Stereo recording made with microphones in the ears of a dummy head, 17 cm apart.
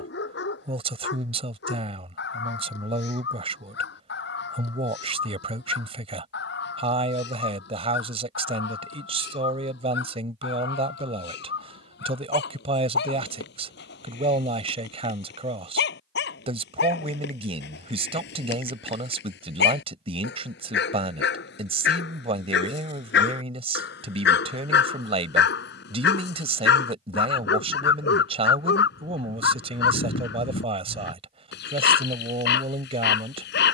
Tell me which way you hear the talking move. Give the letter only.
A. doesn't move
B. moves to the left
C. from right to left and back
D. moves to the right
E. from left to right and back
A.